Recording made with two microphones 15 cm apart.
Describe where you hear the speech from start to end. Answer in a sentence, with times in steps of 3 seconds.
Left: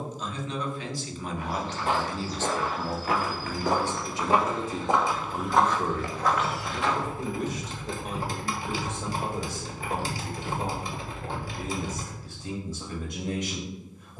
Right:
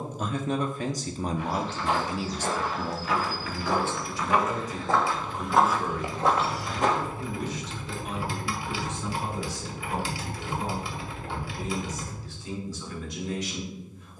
In this clip you hear the speech on the right from 0 s and on the left from 3 s.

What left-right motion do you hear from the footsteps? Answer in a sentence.
You can hear the footsteps go from the left side to the right.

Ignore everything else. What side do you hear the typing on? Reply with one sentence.
In this clip you hear the typing on the left.